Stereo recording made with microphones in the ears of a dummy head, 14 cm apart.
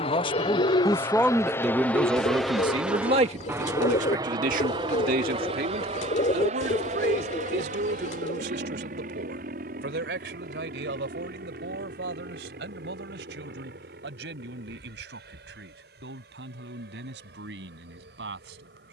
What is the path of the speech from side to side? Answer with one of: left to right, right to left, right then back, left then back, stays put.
left to right.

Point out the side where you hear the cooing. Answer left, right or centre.
left.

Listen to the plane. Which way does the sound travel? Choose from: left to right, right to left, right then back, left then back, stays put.
left to right.